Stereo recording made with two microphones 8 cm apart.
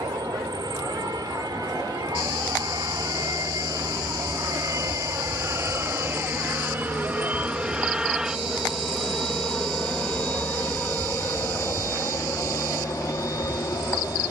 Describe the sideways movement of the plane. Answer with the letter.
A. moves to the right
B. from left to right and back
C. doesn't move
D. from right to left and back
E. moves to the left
E.